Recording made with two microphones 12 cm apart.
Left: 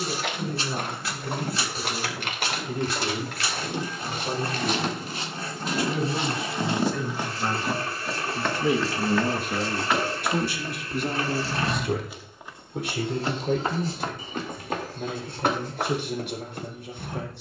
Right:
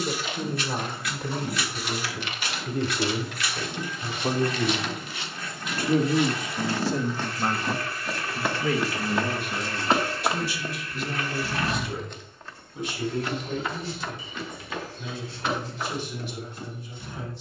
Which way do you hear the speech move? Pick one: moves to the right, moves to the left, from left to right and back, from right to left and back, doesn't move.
moves to the left.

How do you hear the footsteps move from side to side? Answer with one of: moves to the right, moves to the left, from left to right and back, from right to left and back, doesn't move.
from left to right and back.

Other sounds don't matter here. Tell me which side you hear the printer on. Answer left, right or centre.
left.